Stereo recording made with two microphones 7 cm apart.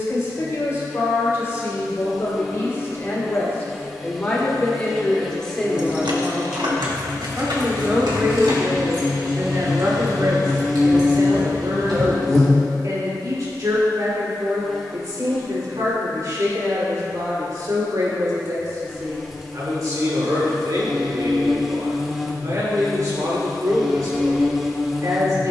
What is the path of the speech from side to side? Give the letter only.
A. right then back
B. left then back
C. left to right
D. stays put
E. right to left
C.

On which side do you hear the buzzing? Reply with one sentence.
In this clip you hear the buzzing in the centre.